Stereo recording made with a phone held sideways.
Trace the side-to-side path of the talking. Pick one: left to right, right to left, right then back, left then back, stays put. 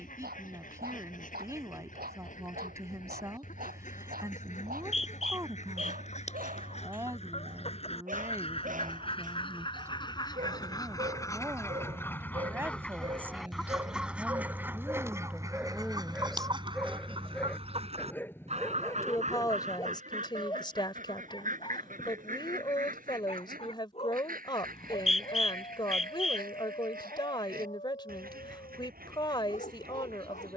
right to left.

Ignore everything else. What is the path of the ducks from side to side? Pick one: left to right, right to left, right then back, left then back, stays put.
left to right.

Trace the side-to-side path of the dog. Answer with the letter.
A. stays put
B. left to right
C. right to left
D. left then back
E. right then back
C.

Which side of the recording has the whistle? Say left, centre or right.
left.